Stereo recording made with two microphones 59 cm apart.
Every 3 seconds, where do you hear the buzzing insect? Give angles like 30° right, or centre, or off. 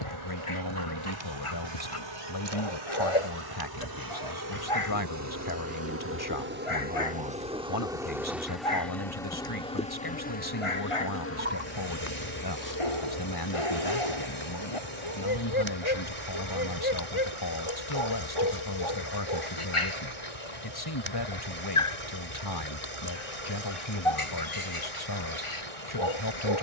50° right, 30° right, 10° right, 20° left, 40° left, 50° left, 60° left, 60° left, 70° left.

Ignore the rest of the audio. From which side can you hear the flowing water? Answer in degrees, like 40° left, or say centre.
70° right.